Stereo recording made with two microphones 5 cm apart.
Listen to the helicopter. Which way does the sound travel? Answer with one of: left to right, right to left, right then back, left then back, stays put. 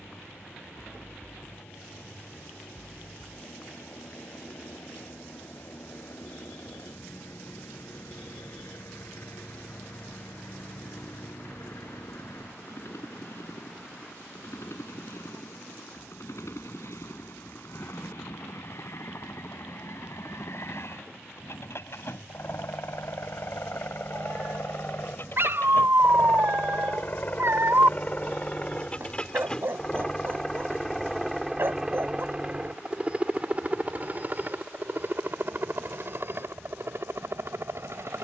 left to right.